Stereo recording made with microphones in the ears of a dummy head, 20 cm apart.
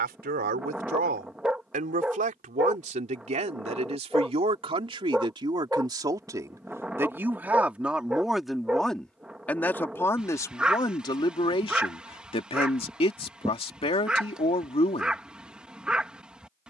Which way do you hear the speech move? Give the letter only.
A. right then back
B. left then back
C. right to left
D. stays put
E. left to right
C.